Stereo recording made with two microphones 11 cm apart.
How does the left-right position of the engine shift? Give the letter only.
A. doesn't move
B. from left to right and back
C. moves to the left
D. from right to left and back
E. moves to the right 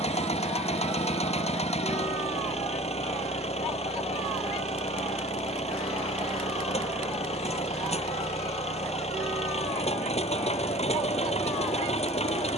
A.